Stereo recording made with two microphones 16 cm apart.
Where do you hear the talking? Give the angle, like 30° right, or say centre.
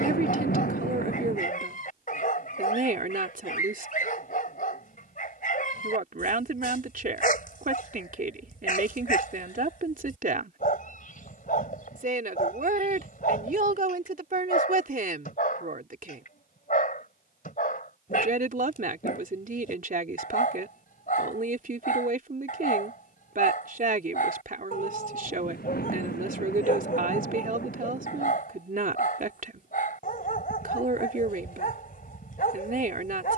60° right.